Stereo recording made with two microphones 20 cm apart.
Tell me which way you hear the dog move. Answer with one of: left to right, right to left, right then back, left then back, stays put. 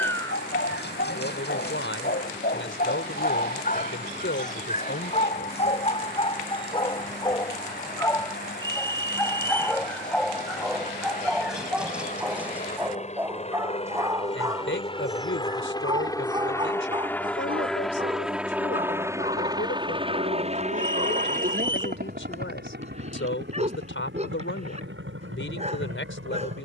left to right.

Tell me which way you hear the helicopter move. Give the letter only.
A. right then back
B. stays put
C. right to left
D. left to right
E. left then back
D.